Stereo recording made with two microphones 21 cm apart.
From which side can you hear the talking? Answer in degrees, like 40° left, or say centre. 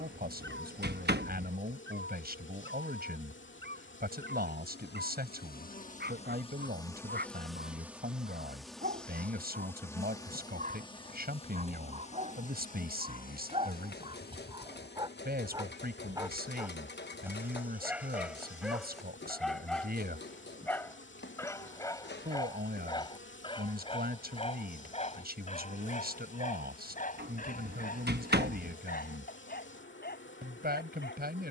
50° right.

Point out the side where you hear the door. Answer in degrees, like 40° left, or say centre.
50° right.